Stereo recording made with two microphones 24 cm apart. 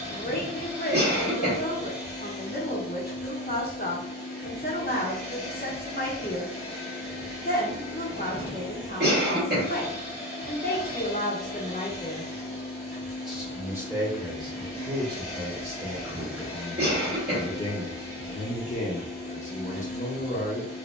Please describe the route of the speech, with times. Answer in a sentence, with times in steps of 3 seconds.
You can hear the speech on the left from 0 s, in the centre from 12 s and on the left from 18 s.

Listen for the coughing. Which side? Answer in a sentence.
In this clip you hear the coughing on the right.